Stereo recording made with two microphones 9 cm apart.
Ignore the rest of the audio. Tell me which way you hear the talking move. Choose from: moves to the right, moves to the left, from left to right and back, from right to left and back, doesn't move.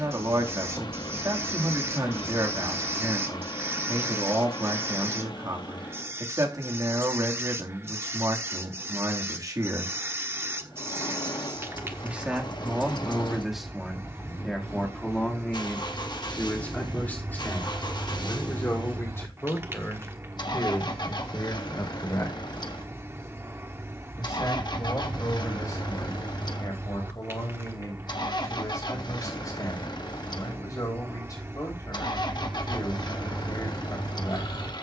moves to the left.